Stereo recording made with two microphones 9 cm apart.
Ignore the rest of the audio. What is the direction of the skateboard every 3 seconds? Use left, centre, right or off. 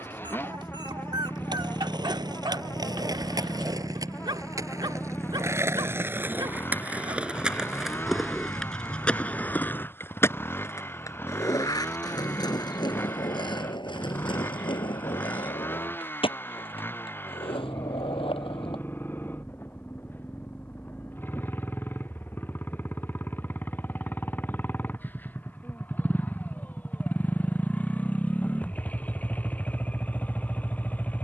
right, right, centre, left, left, left, left, off, off, off, off.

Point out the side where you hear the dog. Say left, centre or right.
right.